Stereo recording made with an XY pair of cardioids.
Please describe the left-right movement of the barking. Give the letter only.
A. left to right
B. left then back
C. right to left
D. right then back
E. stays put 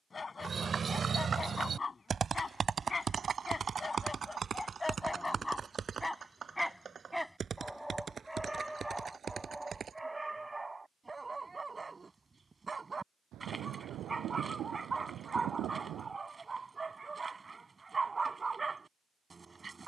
A.